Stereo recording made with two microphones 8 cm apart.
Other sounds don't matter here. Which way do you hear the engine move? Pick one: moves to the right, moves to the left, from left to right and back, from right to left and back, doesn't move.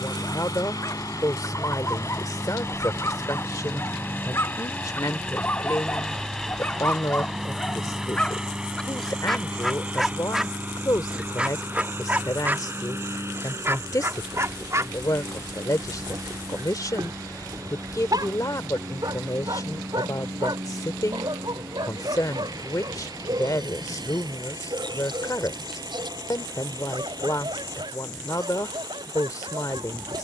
moves to the right.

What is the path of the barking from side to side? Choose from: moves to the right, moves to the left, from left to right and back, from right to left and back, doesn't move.
moves to the right.